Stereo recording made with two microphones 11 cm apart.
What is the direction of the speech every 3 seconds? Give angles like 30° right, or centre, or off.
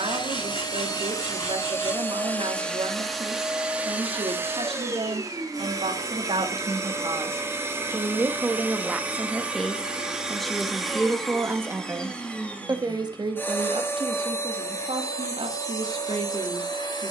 60° right, 60° right, 30° right, 10° right, 50° right, 60° right.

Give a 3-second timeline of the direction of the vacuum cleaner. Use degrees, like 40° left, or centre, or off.
30° left, 20° right, 20° right, centre, 20° left, 40° left.